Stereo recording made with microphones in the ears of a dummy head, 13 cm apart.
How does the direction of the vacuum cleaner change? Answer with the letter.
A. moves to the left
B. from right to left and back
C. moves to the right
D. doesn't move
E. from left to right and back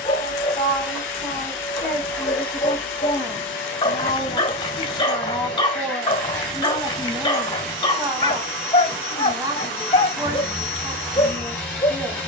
D.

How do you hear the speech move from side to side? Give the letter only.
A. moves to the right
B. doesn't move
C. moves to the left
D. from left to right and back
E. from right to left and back
A.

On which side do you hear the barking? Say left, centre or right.
left.